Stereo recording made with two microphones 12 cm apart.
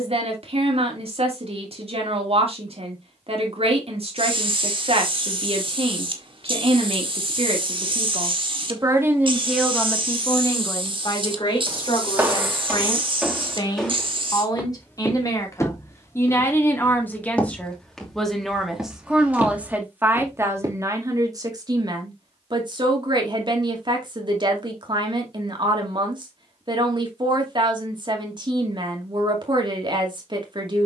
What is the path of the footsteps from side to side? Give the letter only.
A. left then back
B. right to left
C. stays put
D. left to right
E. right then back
A.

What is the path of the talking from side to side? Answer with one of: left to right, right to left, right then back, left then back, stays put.
left then back.